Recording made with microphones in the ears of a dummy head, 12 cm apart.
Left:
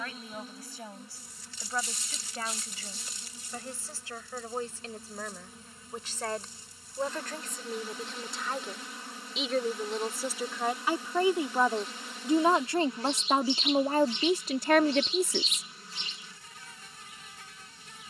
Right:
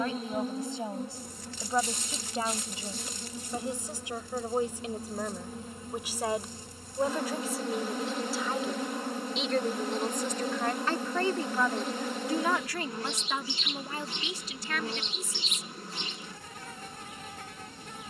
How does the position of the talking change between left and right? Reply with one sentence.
In this clip you hear the talking travel towards the left.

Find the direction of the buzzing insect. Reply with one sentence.
You can hear the buzzing insect on the right.